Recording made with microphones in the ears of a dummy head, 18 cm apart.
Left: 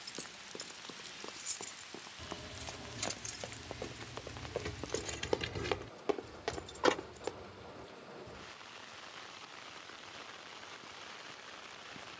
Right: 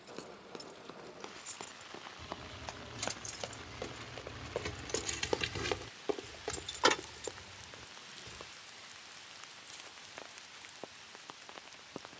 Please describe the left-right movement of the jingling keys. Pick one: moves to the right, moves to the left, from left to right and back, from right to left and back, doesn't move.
moves to the right.